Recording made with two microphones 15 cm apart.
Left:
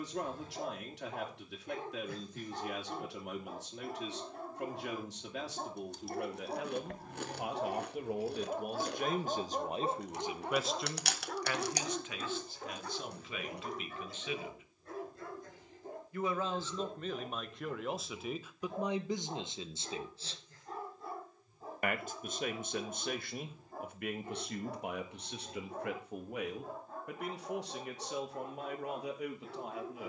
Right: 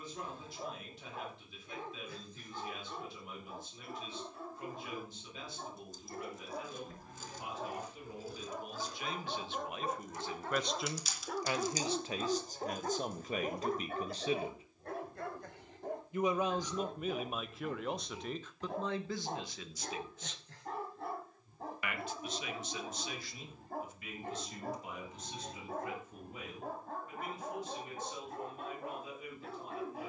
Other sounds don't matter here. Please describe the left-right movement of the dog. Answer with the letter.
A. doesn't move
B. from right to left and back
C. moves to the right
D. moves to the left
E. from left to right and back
C.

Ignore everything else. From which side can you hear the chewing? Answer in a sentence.
You can hear the chewing on the left.